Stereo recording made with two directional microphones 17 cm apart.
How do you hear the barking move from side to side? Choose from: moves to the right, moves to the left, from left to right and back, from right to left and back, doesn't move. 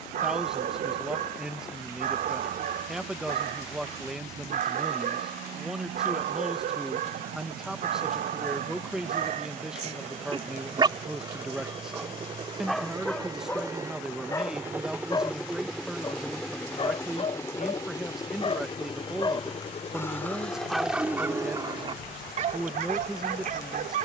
from right to left and back.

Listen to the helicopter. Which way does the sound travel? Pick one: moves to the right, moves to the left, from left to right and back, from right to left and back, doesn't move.
moves to the left.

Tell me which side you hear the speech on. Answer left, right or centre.
centre.